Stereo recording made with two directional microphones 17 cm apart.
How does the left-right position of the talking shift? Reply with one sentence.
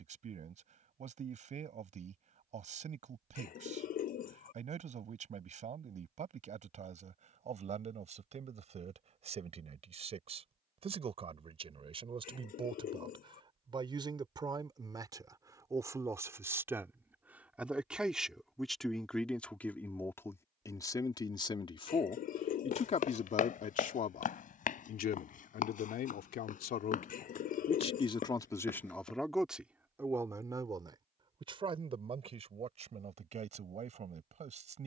You can hear the talking move from right to left and back again.